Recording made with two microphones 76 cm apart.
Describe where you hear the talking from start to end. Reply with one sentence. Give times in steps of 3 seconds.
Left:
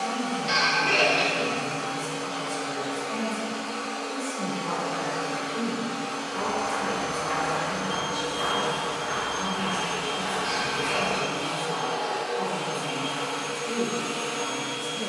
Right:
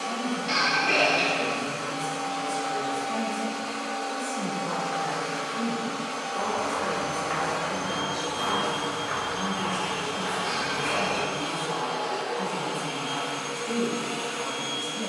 In this clip you hear the talking on the left from 0 s and in the centre from 9 s.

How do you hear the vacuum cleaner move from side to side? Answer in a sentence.
You can hear the vacuum cleaner go right and come back.